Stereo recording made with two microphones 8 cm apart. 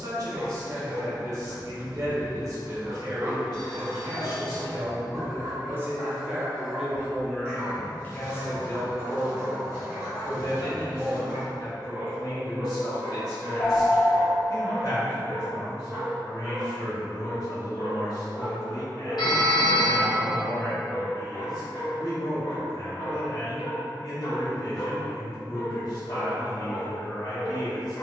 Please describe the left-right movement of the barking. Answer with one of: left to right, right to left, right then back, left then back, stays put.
right to left.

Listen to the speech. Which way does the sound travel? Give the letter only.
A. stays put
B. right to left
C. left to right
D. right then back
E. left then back
B.